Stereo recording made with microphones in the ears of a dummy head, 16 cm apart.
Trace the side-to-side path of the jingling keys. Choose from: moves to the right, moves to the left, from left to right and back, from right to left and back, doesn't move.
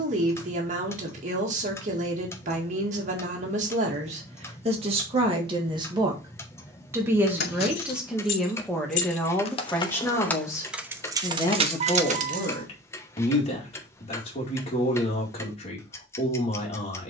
moves to the right.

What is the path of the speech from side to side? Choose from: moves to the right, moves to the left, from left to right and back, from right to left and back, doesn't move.
moves to the left.